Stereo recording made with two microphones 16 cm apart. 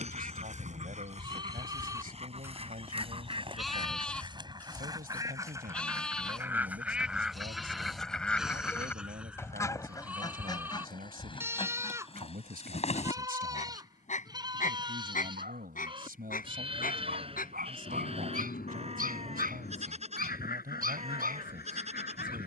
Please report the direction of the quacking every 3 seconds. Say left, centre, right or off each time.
right, right, centre, left, left, left, left, left.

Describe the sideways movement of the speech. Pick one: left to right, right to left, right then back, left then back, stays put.
stays put.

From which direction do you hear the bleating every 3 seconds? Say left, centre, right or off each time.
right, centre, centre, centre, right, right, right, right.